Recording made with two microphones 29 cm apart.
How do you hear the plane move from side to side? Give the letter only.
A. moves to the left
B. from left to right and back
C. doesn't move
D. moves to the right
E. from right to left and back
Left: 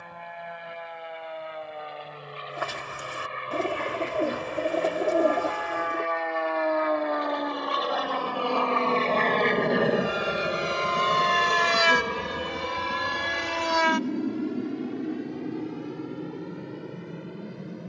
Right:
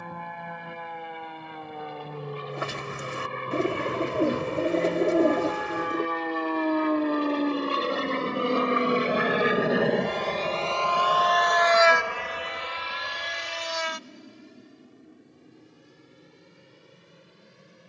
A.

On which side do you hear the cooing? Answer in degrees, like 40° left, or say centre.
30° right.